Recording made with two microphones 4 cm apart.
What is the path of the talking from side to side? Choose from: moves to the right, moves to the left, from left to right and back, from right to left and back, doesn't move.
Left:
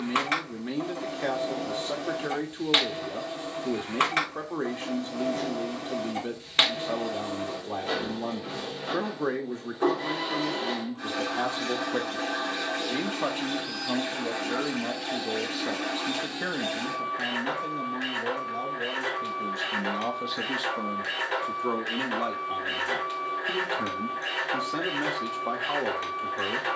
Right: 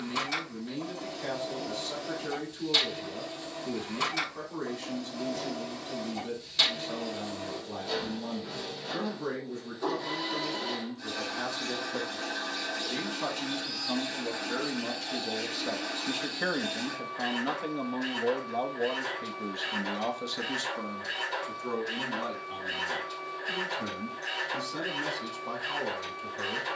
from left to right and back.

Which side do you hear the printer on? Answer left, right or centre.
left.